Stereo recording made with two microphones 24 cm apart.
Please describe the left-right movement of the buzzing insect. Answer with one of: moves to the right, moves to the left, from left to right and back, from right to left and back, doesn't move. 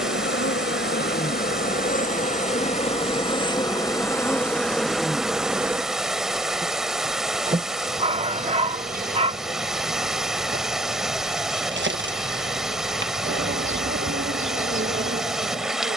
moves to the right.